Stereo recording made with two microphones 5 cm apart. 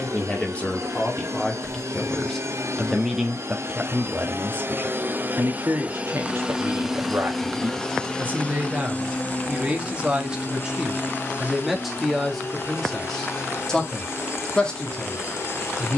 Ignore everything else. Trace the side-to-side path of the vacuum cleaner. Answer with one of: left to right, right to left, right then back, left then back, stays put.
right to left.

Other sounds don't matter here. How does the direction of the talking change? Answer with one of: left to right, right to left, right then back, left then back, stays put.
right then back.